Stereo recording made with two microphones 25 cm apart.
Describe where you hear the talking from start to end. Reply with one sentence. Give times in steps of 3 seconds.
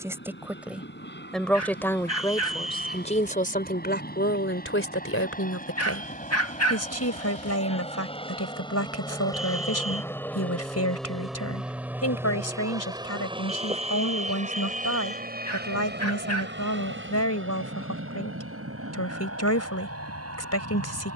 You can hear the talking in the centre from 0 s and on the left from 3 s.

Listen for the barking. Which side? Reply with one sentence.
You can hear the barking on the left.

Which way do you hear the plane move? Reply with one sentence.
In this clip you hear the plane travel towards the right.